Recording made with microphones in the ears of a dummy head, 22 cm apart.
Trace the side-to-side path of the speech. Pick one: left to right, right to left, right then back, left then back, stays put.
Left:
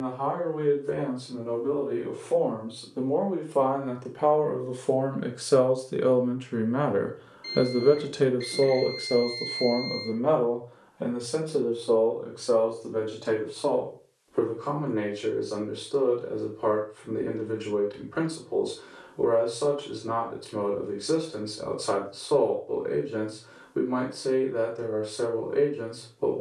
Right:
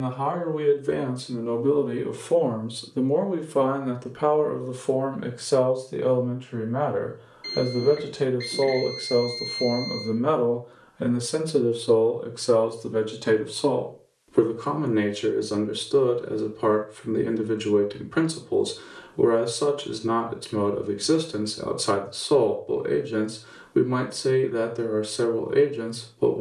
left then back.